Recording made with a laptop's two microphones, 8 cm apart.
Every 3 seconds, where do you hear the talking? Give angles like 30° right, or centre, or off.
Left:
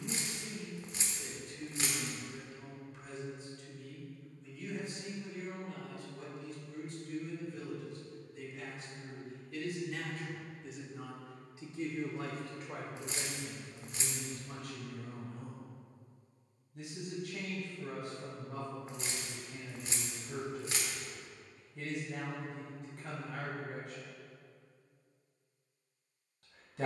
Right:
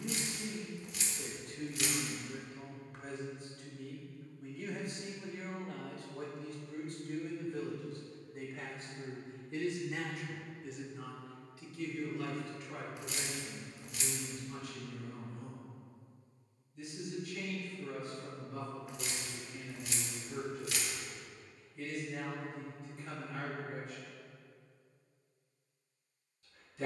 60° right, 60° right, 50° right, centre, 50° left, 70° left, 70° left, 70° left, 70° left.